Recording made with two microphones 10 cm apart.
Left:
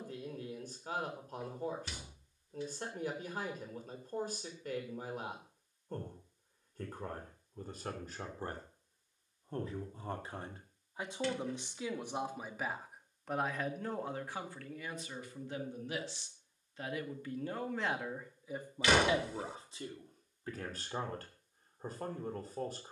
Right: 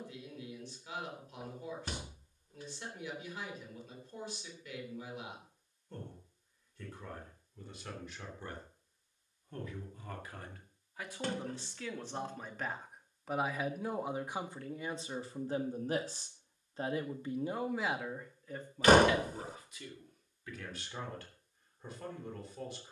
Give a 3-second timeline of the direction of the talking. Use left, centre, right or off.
left, left, left, left, centre, right, left, left.